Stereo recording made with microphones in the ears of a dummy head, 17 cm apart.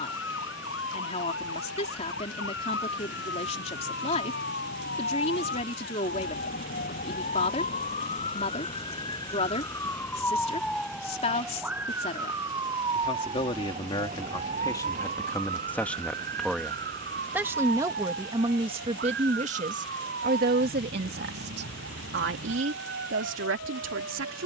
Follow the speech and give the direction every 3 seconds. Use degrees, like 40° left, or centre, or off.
30° left, 30° left, 30° left, 30° left, 30° left, centre, 40° right, 70° right.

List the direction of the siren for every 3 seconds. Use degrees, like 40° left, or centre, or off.
70° left, 60° left, 40° left, 10° left, 30° right, 50° right, 60° right, 60° right.